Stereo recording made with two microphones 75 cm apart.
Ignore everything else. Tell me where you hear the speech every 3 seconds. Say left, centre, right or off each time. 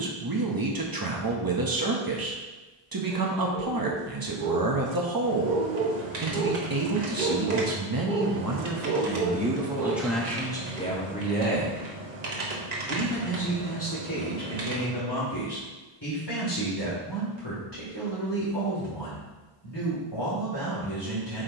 right, right, right, centre, left, left, left.